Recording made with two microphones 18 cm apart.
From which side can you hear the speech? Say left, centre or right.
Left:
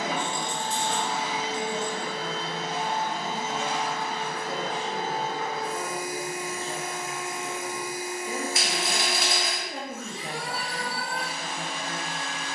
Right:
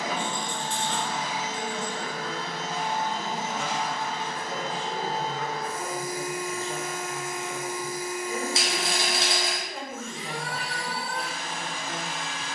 left.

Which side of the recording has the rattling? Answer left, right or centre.
right.